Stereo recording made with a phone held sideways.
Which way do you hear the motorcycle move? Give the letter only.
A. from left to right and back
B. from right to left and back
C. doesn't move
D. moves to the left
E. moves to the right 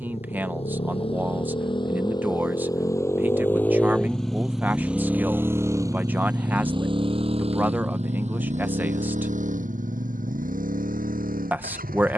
E.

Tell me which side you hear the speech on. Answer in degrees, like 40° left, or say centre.
10° right.